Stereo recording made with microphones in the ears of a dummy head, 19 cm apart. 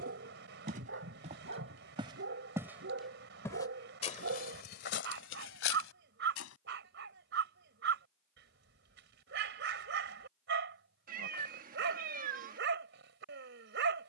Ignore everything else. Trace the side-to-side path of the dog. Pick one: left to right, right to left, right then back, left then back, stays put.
stays put.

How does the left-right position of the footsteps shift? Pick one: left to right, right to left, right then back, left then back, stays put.
right to left.